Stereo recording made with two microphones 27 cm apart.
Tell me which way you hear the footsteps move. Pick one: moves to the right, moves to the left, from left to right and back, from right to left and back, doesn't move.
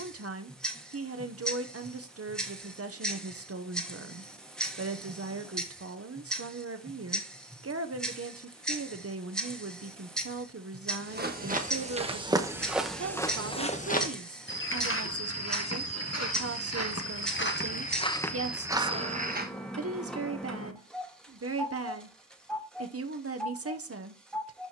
from right to left and back.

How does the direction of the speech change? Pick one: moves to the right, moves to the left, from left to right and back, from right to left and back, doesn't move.
doesn't move.